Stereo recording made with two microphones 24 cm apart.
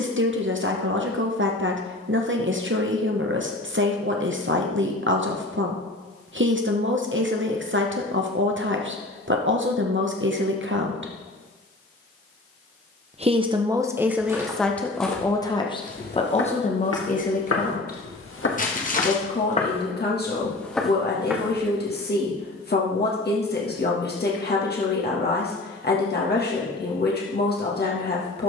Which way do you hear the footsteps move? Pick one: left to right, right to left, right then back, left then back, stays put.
left then back.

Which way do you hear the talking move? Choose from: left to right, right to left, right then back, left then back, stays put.
right to left.